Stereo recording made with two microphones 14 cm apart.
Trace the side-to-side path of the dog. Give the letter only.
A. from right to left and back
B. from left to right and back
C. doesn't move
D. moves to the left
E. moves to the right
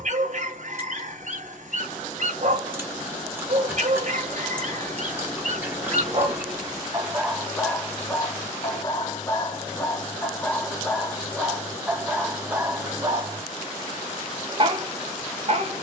A.